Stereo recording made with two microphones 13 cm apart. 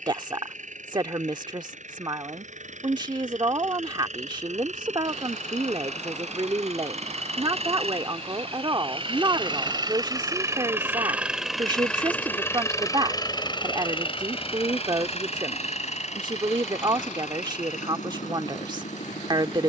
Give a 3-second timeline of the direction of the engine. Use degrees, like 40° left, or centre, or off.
70° right, 70° right, 60° right, 20° right, 40° left, 60° left, 70° left.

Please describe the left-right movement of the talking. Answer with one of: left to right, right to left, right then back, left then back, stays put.
stays put.